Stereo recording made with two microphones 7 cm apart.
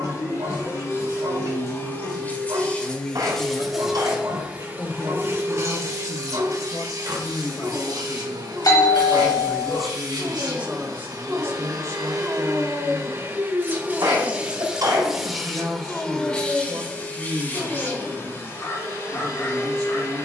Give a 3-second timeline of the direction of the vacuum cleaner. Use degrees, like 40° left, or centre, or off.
30° left, 20° right, 60° right, 60° right, 30° right, 10° left, 40° left.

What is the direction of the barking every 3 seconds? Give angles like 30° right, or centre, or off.
60° right, 60° right, 60° right, 40° right, 10° right, 20° left, 40° left.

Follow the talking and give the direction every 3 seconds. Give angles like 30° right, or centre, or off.
60° left, 60° left, 40° left, 20° right, 50° right, 50° right, 50° right.